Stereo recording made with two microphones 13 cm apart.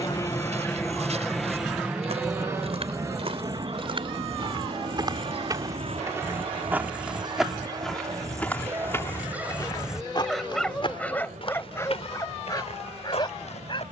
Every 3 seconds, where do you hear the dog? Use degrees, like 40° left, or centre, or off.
60° right, 60° right, 30° right, centre, 30° left.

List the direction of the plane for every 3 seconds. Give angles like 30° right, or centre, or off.
centre, 40° right, 50° right, 60° right, 60° right.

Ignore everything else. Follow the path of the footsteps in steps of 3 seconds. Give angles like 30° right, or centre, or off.
60° right, 40° right, centre, 40° left, 60° left.